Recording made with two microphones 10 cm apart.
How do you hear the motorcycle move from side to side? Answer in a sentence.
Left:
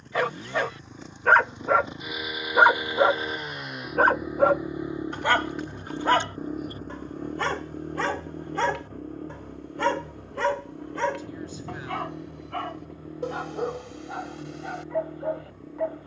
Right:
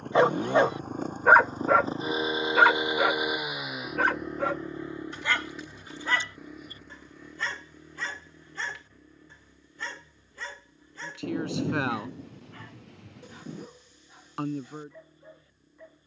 In this clip you hear the motorcycle go from the right side to the left.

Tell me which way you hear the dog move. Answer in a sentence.
In this clip you hear the dog go from the right side to the left.